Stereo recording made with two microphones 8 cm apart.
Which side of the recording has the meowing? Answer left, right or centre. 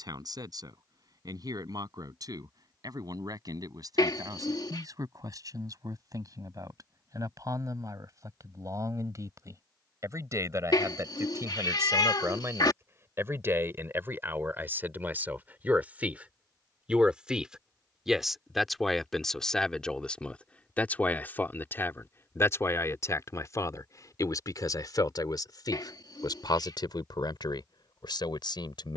left.